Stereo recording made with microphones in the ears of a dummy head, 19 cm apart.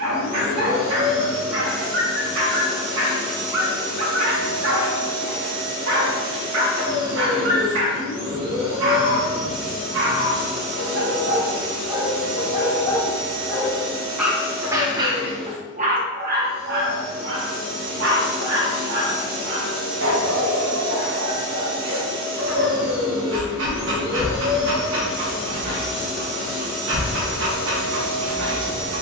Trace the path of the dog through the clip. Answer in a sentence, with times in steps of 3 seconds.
In this clip you hear the dog on the right from 0 s, in the centre from 12 s and on the right from 15 s.